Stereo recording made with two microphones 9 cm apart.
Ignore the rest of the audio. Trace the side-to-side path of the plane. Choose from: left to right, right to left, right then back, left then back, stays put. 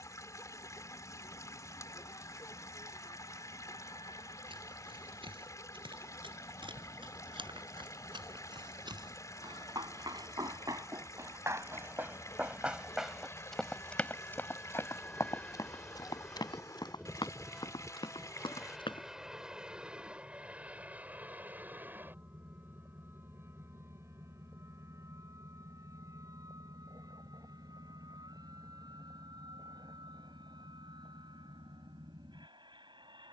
left to right.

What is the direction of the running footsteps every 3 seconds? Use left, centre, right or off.
off, right, right, right, centre, left, left, off, off, off, off.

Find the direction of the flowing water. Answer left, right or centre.
left.